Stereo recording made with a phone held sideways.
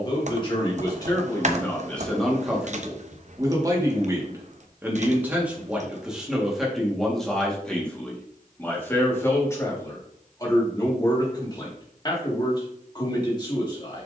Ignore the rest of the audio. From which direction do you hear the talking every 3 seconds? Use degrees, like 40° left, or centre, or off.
20° left, 20° right, centre, 20° left, 30° left.